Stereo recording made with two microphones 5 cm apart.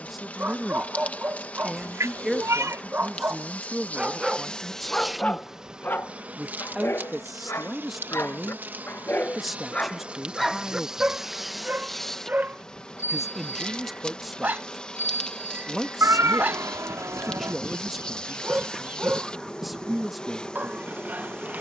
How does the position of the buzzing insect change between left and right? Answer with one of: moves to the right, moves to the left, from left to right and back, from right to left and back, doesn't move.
from left to right and back.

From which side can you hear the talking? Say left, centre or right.
centre.